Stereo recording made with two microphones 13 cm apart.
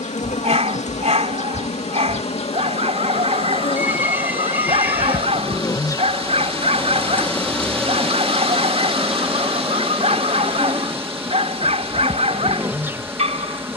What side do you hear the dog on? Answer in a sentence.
In this clip you hear the dog on the right.